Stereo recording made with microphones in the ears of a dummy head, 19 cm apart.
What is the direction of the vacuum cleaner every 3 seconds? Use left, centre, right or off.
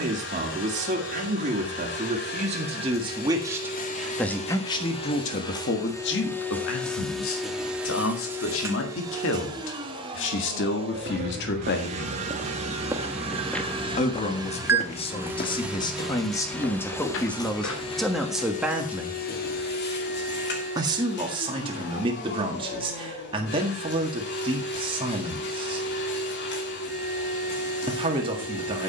left, left, centre, right, right, centre, left, left, left, left.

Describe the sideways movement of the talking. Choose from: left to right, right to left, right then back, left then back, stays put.
left then back.